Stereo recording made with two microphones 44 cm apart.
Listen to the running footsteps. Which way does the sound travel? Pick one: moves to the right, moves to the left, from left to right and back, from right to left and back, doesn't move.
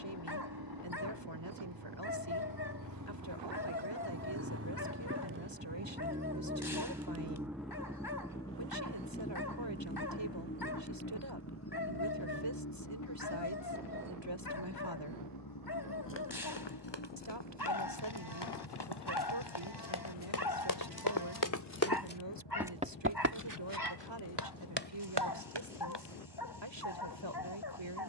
moves to the right.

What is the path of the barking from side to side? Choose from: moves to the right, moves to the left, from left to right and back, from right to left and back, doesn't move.
doesn't move.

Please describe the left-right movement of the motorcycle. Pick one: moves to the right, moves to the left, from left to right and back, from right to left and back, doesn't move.
moves to the left.